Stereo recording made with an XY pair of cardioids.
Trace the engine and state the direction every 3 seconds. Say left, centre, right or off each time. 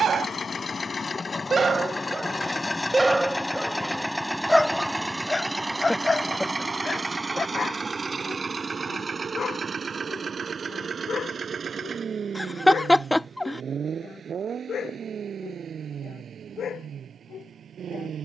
left, centre, right, right, right, right.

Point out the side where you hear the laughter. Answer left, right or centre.
centre.